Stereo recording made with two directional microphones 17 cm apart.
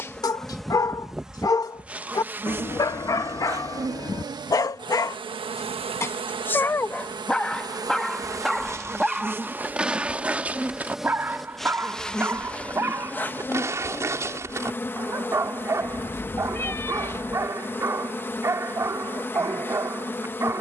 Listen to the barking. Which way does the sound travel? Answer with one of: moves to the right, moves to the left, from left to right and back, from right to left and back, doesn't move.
moves to the right.